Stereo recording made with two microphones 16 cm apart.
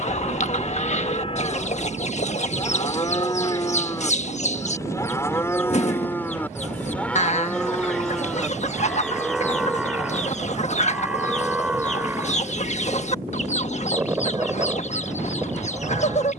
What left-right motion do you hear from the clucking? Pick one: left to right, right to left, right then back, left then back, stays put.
stays put.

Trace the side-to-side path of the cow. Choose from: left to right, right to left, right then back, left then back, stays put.
left to right.